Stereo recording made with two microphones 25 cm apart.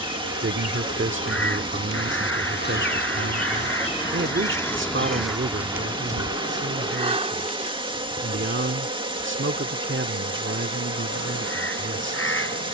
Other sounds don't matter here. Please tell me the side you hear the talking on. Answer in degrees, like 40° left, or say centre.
50° right.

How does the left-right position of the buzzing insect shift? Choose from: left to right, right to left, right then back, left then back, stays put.
left to right.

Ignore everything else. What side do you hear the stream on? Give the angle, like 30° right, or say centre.
20° right.